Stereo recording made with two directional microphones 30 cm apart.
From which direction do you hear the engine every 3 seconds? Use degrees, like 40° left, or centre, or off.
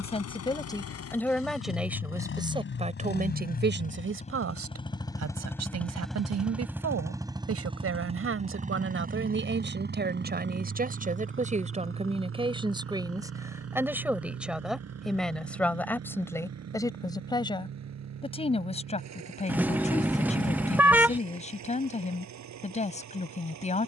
50° left, 20° left, 10° right, 40° right, 50° right, 60° right, 60° right, 70° right.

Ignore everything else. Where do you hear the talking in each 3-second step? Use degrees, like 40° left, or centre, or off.
centre, 50° right, 50° right, 30° right, 10° right, 10° left, 20° left, 20° left.